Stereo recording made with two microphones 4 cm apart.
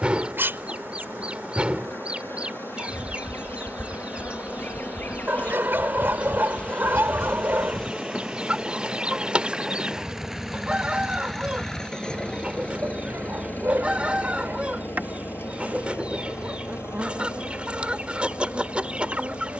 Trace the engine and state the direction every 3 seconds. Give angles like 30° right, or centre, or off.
50° right, 40° right, 30° right, centre, 40° left, 70° left, 80° left.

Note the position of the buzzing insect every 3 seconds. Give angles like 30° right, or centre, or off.
70° left, 50° left, 20° left, 20° right, 40° right, 40° right, 40° right.